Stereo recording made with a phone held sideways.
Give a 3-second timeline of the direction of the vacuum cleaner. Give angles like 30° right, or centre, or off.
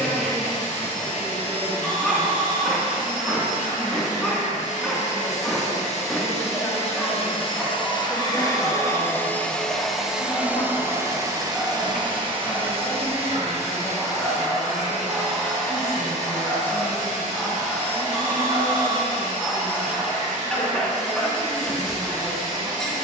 70° left, 60° left, 40° left, 10° right, 50° right, 60° right, 60° right, 60° right.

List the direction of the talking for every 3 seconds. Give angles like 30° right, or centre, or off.
20° right, 10° right, 20° left, 60° left, 20° left, 10° right, 20° right, 20° right.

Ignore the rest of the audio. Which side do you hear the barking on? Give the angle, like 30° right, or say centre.
centre.